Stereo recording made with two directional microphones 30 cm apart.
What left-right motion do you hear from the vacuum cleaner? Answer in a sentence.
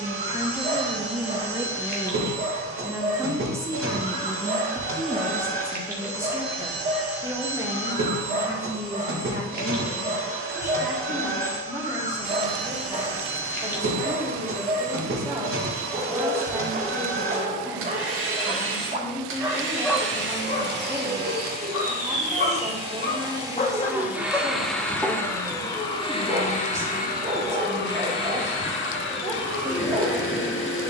You can hear the vacuum cleaner go from the right side to the left.